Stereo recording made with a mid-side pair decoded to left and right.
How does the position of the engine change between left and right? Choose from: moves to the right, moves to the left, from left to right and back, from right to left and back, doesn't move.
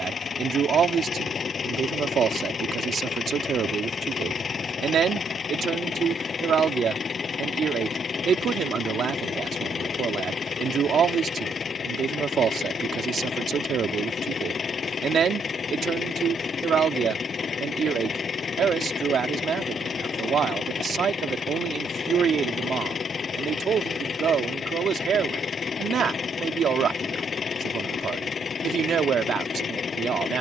doesn't move.